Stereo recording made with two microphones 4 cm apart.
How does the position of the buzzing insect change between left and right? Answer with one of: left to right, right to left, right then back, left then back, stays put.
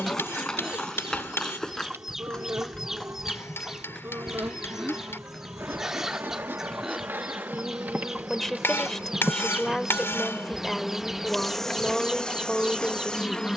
right to left.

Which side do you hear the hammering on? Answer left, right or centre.
left.